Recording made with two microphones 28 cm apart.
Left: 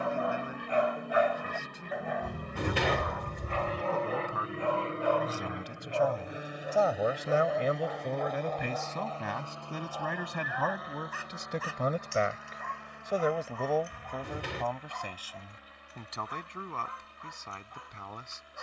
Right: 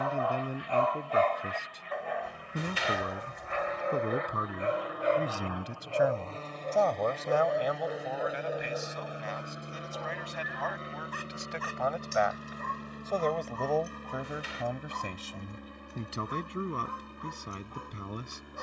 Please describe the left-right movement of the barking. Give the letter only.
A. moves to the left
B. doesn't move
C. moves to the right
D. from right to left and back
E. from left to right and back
C.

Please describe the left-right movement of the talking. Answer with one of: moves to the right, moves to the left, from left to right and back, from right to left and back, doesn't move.
from right to left and back.